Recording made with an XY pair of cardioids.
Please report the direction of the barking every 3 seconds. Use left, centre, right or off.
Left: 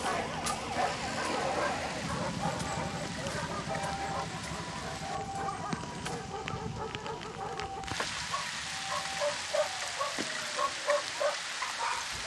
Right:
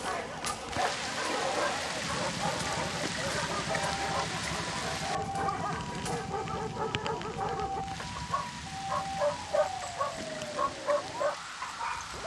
centre, right, right, centre.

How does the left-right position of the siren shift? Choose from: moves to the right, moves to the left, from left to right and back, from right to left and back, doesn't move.
moves to the right.